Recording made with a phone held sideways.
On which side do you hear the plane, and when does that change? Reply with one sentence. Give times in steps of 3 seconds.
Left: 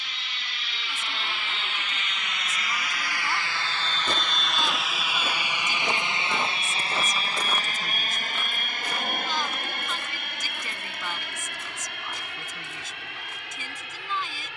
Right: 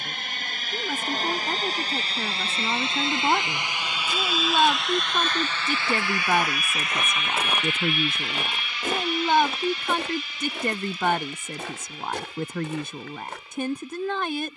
You can hear the plane on the right from 0 s, in the centre from 3 s and on the left from 6 s.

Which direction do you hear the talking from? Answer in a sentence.
You can hear the talking on the right.